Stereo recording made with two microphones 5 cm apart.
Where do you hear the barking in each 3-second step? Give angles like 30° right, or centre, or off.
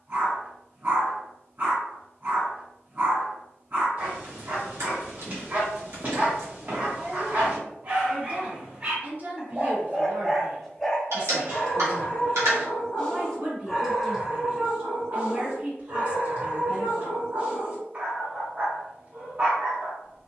40° right, 40° right, 40° right, centre, centre, 40° right, 40° right.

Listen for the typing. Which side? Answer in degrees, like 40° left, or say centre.
80° right.